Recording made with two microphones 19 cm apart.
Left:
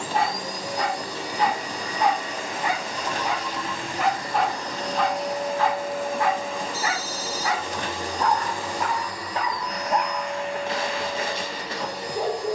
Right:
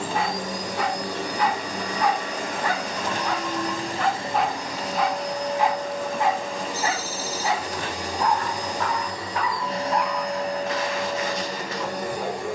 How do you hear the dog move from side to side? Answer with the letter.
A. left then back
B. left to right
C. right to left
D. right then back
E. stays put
D.